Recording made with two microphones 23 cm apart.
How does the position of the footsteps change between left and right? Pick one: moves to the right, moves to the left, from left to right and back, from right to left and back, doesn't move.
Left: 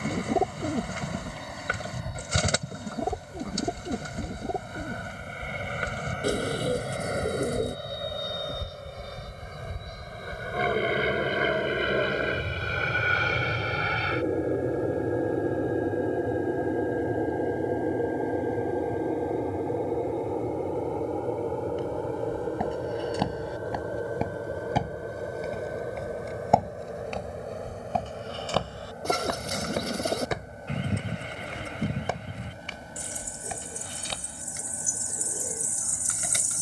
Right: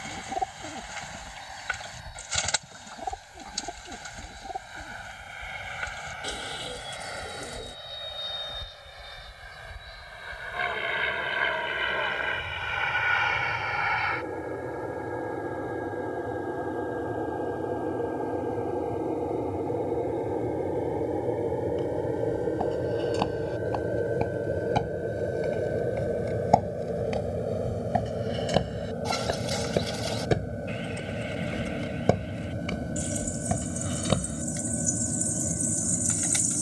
moves to the right.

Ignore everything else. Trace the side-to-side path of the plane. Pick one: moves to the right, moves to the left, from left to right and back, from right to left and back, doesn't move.
moves to the right.